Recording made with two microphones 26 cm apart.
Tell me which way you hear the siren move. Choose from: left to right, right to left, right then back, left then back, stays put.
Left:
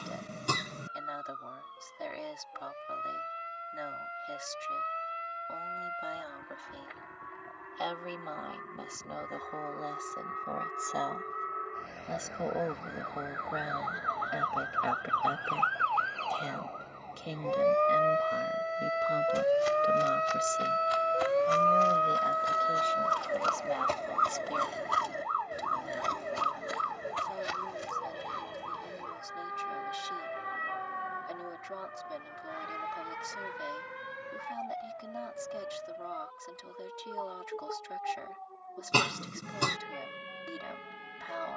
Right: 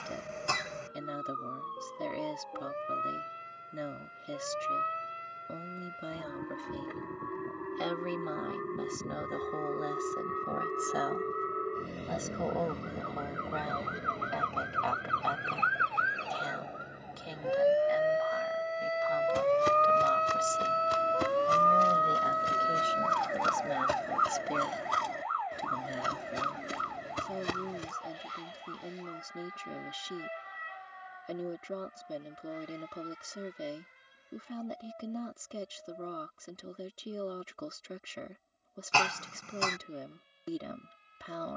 right to left.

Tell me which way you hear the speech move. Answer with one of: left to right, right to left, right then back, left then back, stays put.
left then back.